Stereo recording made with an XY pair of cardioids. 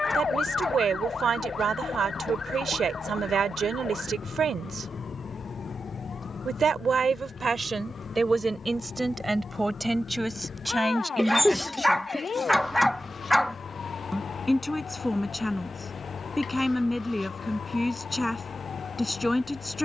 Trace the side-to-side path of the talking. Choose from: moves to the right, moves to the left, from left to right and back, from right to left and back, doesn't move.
moves to the left.